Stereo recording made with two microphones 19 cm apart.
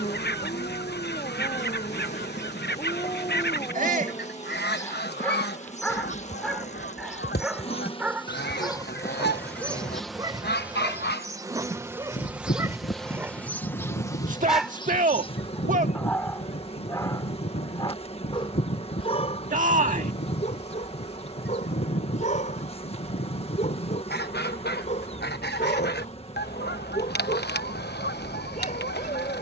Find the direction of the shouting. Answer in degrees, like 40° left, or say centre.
40° right.